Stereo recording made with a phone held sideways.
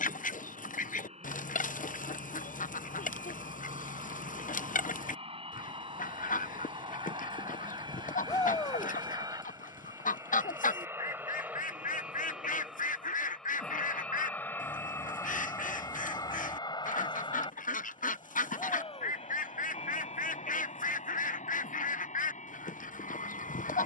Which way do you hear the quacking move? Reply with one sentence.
In this clip you hear the quacking stay in one place.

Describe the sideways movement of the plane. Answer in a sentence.
In this clip you hear the plane move to the left.